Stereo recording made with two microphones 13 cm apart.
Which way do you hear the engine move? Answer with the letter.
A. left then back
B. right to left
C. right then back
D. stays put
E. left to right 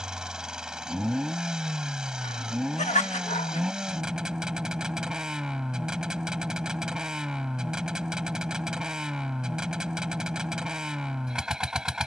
D.